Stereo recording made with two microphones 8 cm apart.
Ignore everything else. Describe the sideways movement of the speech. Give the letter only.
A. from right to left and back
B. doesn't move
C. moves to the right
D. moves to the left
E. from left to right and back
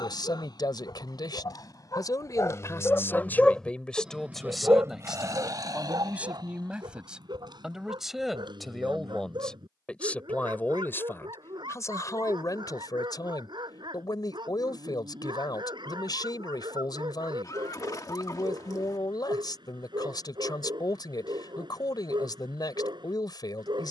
E.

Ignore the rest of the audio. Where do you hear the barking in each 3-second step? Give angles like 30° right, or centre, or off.
50° left, 20° right, 70° right, 80° right, 80° right, 80° right, 80° right, 80° right.